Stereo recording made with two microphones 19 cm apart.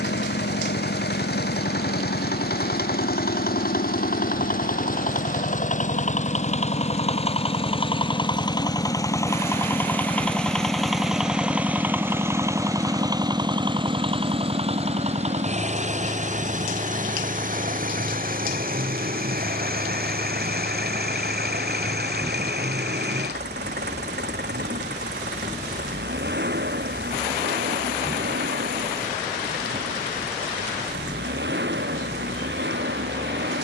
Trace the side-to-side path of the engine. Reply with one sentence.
In this clip you hear the engine move to the right.